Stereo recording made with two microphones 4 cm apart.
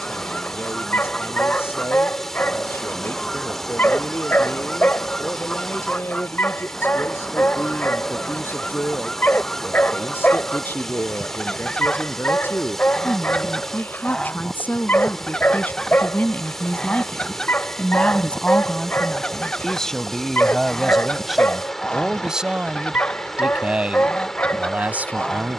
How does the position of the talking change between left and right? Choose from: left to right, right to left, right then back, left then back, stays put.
left to right.